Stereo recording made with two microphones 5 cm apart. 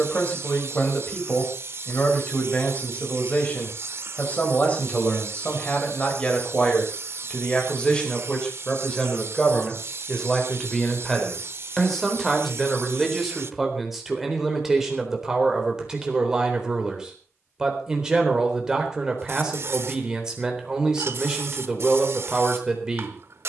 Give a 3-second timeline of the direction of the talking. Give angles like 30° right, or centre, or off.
30° left, 30° left, 20° left, 10° left, centre, 10° right, 10° right, 10° right.